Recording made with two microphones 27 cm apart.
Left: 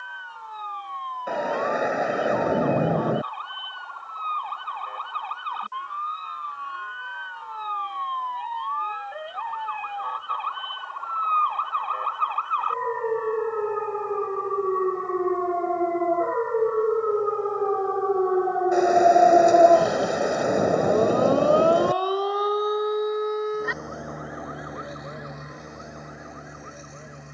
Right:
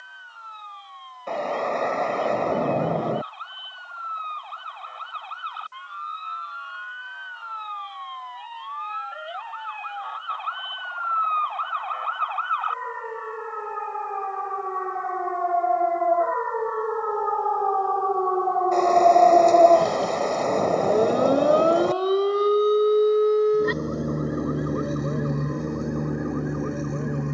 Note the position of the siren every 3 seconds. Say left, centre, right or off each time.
left, left, left, left, left, left, centre, right, right.